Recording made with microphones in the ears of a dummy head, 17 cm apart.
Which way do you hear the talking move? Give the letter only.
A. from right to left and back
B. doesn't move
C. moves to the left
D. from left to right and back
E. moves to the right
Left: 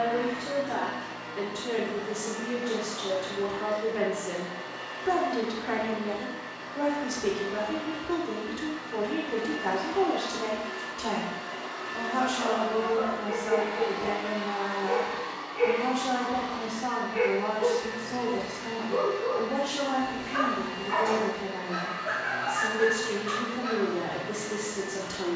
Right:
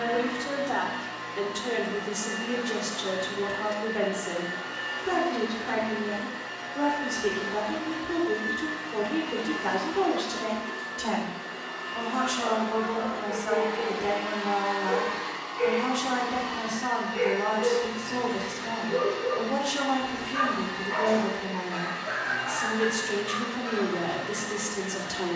A.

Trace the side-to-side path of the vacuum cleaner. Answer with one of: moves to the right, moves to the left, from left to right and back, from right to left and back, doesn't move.
from right to left and back.